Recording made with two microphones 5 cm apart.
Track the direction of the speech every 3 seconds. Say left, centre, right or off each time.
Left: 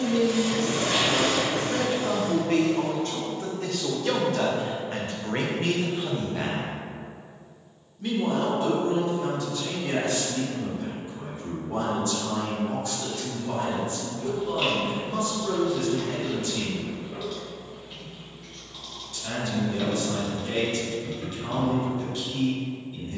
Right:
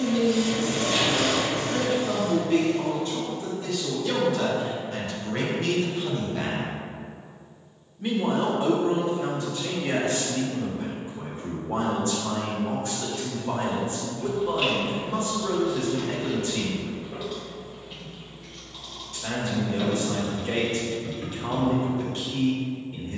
left, left, centre, right, right, right, right, right.